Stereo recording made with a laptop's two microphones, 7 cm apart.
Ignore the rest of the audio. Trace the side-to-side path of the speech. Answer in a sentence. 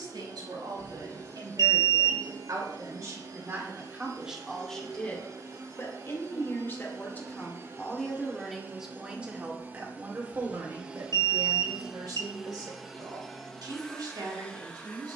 In this clip you hear the speech move from right to left and back again.